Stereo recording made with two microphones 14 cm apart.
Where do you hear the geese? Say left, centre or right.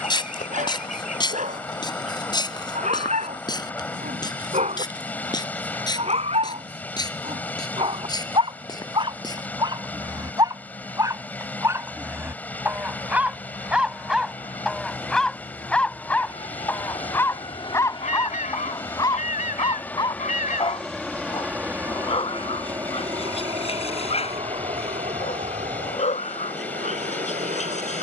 left.